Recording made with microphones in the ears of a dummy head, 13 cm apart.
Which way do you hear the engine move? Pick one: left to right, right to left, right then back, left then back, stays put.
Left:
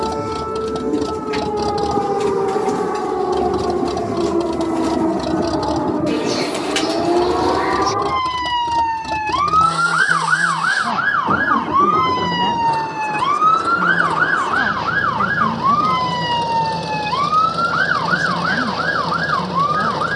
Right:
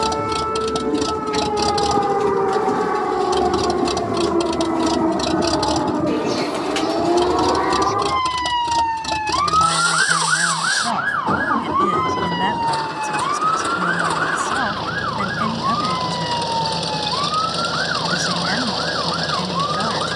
stays put.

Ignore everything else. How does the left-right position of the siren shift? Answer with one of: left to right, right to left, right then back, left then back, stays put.
right to left.